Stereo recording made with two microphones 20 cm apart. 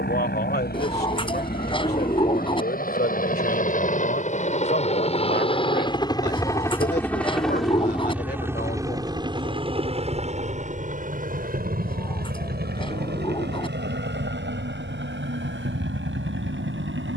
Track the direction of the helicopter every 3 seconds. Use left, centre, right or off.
left, left, centre, right, right, right.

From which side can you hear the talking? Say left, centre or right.
left.